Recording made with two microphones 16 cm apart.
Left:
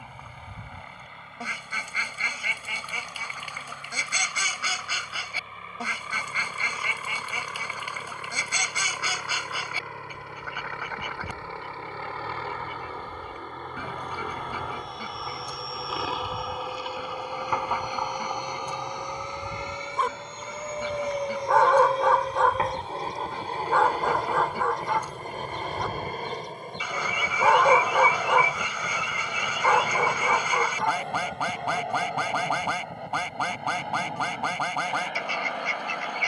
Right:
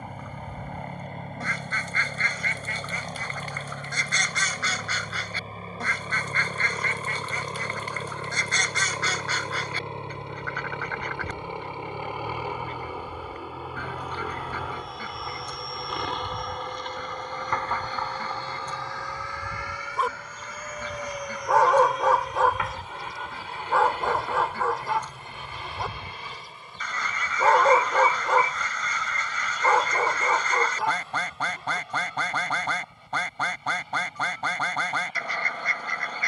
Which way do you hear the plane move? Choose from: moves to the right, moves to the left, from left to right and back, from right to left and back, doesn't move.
moves to the left.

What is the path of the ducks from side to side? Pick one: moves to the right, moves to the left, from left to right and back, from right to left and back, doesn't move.
doesn't move.